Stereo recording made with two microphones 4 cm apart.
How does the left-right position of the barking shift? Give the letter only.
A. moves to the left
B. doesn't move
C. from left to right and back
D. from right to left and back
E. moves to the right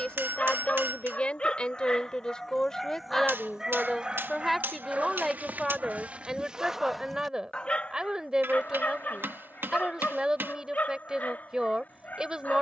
C.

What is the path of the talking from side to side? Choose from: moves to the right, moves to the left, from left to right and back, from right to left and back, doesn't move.
moves to the right.